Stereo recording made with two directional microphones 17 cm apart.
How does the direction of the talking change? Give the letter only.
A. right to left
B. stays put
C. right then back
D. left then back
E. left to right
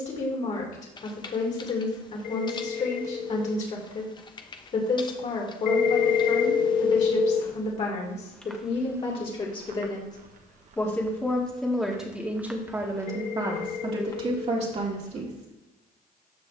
E.